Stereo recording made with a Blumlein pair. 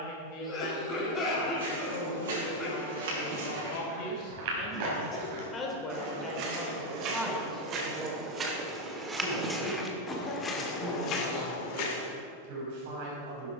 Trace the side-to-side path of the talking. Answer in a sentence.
You can hear the talking move to the right.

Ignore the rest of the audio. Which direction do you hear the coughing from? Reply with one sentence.
You can hear the coughing on the left.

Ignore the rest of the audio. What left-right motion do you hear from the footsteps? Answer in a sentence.
In this clip you hear the footsteps move to the left.